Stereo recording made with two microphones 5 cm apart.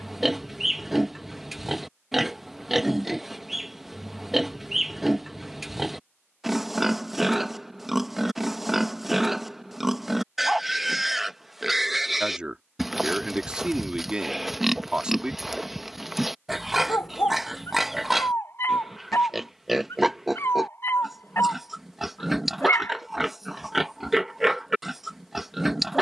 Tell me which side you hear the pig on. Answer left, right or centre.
centre.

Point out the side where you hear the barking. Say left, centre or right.
left.